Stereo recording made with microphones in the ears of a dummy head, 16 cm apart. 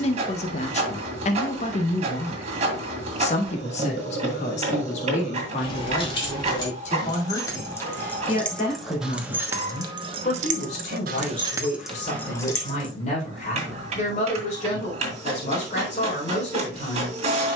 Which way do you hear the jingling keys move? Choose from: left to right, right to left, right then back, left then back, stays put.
right then back.